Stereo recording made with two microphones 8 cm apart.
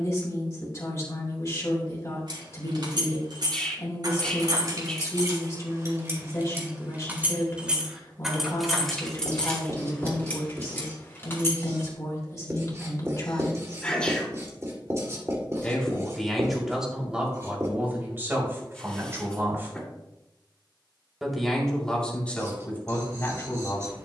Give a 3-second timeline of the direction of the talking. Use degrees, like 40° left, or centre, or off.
40° left, 40° left, 40° left, 40° left, 40° left, 10° right, 30° right, 20° left.